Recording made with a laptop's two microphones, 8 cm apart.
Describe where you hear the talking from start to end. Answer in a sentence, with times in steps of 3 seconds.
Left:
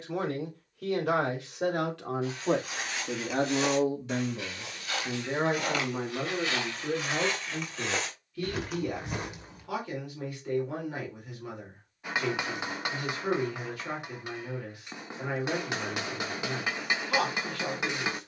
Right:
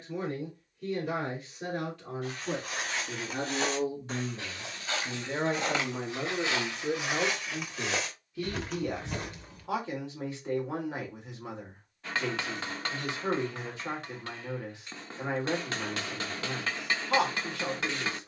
In this clip you hear the talking on the left from 0 s, in the centre from 6 s and on the right from 9 s.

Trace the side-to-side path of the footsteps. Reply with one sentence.
You can hear the footsteps go from the right side to the left.